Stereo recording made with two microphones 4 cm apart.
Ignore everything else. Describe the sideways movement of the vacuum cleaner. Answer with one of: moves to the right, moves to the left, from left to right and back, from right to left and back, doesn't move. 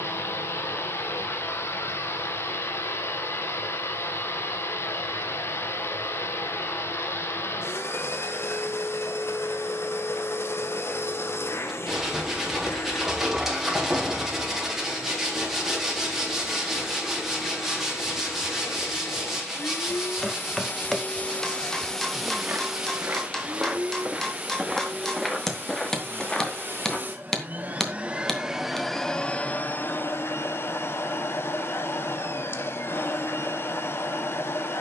from left to right and back.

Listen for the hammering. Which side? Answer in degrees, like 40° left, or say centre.
10° left.